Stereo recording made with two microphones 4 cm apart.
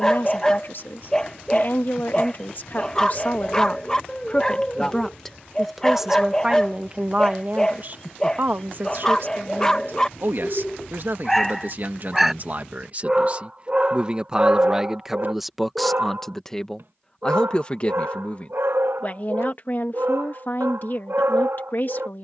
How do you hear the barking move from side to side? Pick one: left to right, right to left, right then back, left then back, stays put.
left to right.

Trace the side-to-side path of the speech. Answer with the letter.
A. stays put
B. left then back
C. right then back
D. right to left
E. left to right
C.